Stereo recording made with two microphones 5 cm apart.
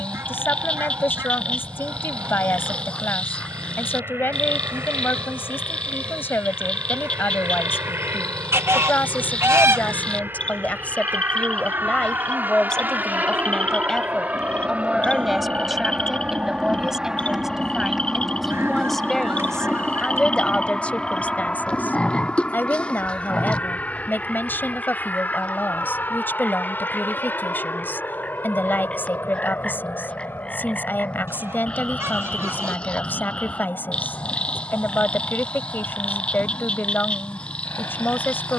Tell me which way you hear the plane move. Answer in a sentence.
You can hear the plane move to the left.